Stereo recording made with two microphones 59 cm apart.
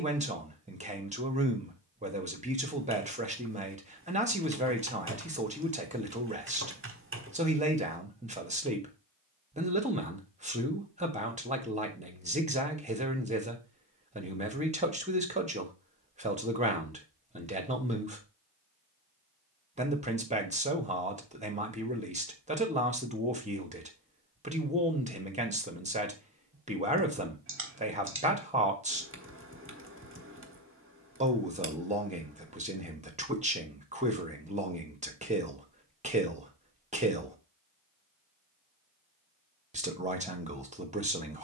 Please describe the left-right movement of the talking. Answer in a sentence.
You can hear the talking stay in one place.